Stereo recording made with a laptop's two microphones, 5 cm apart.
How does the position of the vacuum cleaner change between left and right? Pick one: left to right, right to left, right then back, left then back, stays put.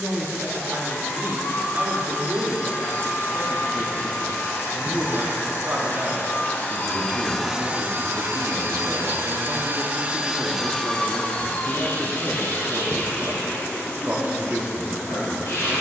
right then back.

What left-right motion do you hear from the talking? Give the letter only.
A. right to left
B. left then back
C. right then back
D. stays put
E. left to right
D.